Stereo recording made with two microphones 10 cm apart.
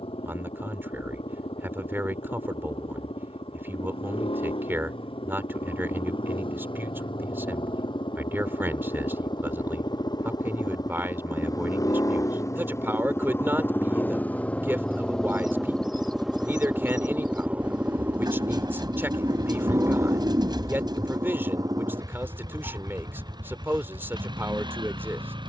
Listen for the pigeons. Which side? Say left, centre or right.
right.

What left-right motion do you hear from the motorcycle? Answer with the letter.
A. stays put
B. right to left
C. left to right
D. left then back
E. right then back
C.